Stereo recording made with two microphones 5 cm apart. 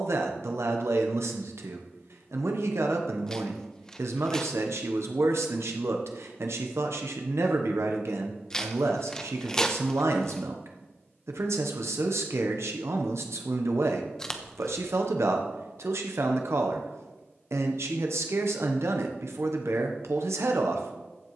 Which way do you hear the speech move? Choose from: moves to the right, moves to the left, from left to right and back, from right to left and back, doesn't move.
doesn't move.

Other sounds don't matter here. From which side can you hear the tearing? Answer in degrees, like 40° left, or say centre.
10° left.